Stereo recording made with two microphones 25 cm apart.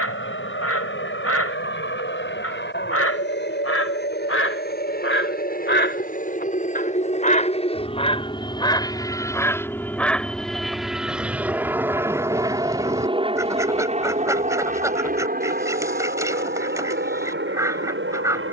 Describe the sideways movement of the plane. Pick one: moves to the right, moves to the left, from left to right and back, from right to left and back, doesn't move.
moves to the right.